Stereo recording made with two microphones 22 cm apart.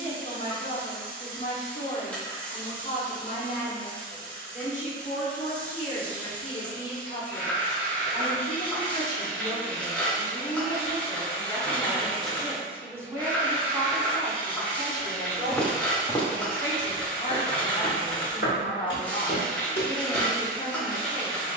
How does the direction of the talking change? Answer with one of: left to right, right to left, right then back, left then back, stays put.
right then back.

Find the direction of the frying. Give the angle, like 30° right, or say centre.
10° left.